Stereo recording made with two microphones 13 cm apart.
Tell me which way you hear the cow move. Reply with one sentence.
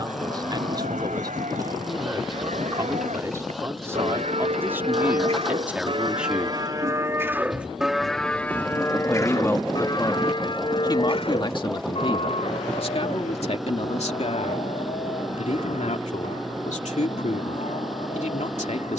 In this clip you hear the cow move from right to left.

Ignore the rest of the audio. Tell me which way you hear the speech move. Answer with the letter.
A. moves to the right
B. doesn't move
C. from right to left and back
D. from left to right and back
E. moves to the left
E.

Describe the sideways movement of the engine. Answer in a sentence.
You can hear the engine stay in one place.